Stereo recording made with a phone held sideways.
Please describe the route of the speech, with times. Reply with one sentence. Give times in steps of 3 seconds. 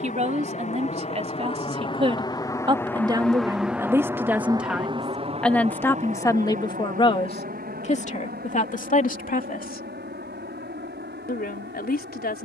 In this clip you hear the speech on the right from 0 s, in the centre from 3 s and on the left from 6 s.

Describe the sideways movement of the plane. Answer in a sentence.
You can hear the plane travel towards the right.